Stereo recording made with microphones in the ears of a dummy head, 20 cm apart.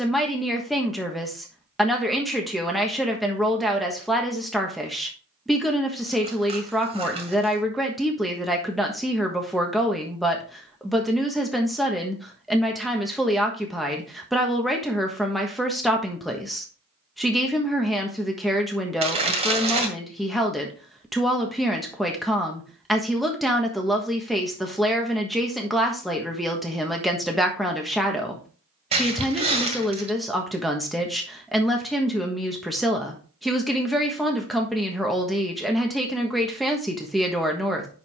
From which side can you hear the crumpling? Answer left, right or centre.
right.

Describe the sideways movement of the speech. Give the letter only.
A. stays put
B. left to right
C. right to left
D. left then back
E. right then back
A.